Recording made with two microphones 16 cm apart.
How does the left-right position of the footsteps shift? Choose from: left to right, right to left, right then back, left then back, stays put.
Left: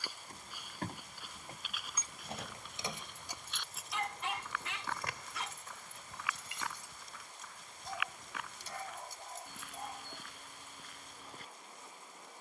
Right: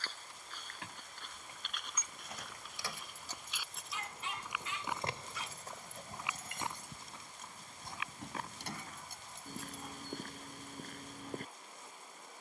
left to right.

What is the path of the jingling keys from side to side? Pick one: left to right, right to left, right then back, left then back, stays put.
left to right.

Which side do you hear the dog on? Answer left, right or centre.
left.